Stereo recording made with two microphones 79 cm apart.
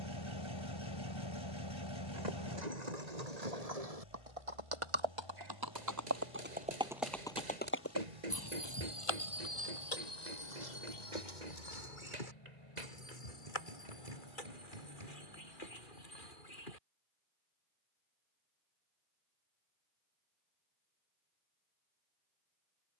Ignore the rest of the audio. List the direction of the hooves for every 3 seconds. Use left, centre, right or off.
right, right, centre, left, left, left, off, off.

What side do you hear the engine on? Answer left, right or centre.
left.